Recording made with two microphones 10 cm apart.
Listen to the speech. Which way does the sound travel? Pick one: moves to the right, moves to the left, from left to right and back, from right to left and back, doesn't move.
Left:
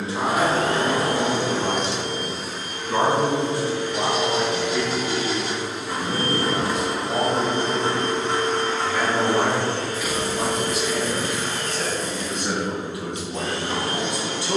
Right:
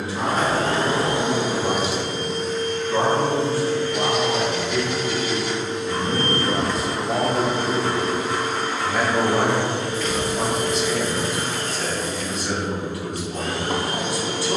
from left to right and back.